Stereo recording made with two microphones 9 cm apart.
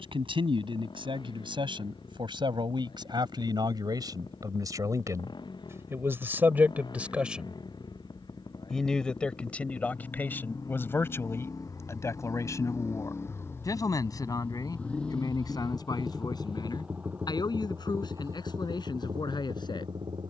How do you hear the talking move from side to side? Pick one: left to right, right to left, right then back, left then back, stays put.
right to left.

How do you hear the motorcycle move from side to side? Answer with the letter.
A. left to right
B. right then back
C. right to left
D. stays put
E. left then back
A.